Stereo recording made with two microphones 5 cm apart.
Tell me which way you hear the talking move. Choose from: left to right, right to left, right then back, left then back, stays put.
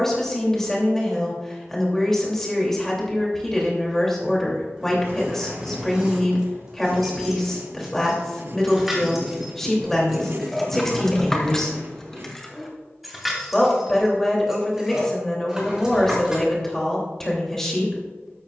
stays put.